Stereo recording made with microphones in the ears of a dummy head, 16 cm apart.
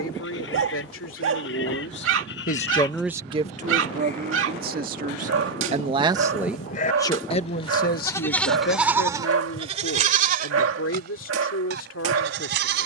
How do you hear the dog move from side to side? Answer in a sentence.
You can hear the dog stay in one place.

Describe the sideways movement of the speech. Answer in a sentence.
You can hear the speech move from left to right and back again.